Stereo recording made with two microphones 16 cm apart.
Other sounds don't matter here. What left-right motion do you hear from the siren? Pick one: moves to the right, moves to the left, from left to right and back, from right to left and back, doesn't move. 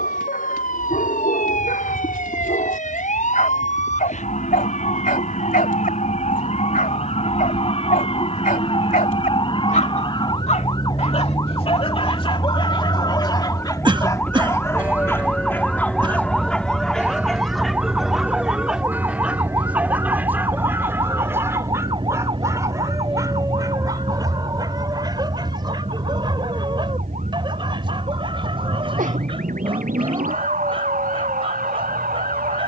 moves to the right.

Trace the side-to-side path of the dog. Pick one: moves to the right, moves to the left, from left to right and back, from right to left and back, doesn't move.
moves to the right.